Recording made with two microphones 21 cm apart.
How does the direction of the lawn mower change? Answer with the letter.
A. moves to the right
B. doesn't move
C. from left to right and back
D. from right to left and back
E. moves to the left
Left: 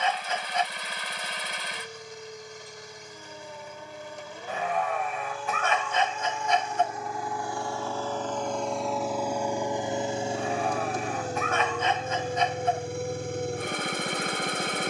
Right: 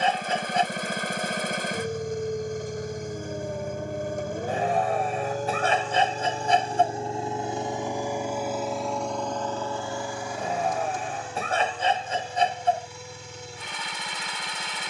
E.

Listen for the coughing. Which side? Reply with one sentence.
You can hear the coughing on the right.